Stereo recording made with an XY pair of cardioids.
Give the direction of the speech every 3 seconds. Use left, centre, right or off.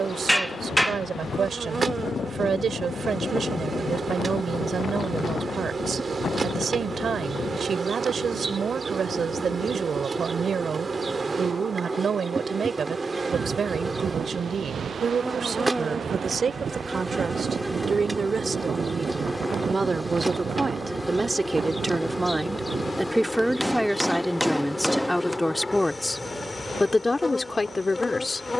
right, right, right, right, right, right, right, centre, centre, left.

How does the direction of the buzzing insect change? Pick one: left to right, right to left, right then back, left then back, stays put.
right to left.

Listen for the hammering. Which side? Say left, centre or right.
centre.